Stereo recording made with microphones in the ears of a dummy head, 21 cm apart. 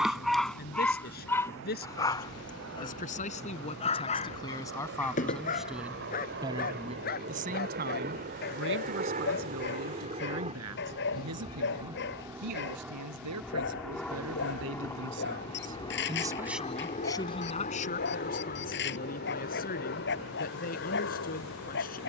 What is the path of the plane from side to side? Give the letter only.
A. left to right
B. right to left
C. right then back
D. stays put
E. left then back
B.